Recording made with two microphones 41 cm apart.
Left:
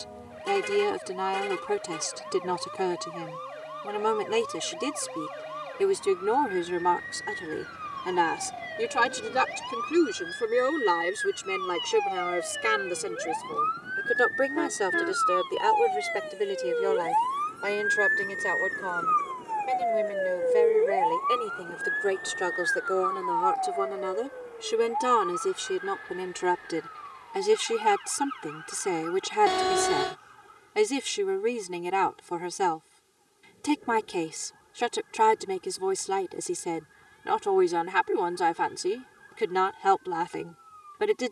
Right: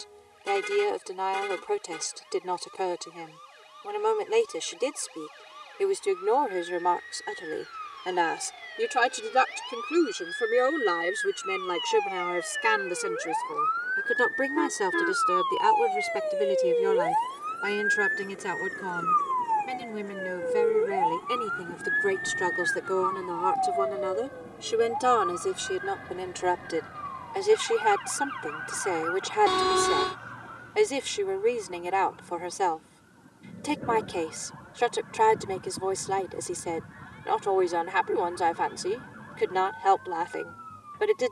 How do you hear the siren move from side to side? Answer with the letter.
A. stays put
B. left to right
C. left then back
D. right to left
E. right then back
B.